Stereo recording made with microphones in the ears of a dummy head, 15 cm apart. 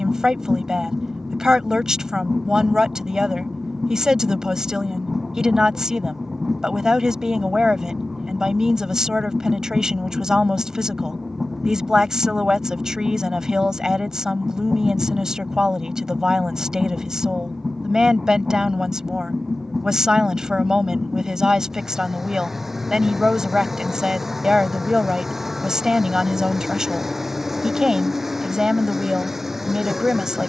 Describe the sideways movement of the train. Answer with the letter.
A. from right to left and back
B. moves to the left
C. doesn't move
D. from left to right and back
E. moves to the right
C.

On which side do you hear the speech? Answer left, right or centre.
centre.